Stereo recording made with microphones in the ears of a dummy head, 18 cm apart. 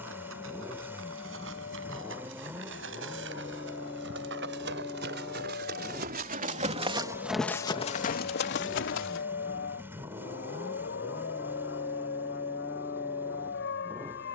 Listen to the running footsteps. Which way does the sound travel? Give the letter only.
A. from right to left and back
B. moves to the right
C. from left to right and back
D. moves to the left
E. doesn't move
D.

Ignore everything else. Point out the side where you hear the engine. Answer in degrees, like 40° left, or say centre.
10° right.